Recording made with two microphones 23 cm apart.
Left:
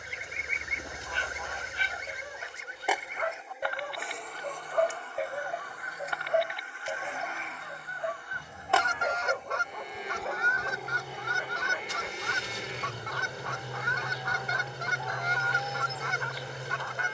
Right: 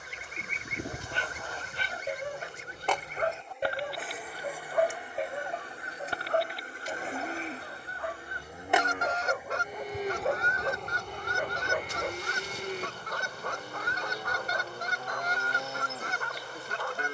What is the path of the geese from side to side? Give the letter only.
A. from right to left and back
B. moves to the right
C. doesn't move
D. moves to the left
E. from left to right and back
C.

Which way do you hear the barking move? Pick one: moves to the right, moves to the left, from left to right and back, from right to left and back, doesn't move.
from right to left and back.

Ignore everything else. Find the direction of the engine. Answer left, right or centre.
left.